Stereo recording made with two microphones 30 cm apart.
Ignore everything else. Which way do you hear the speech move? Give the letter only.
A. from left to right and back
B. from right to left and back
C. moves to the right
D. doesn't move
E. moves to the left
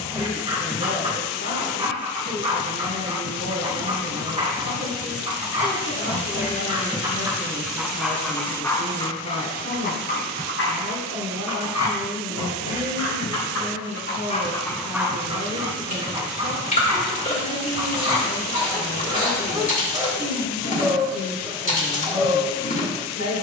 D.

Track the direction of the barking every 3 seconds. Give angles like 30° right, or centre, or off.
20° right, 20° right, 10° right, 40° left, 50° left, 20° right, 20° right, 20° right.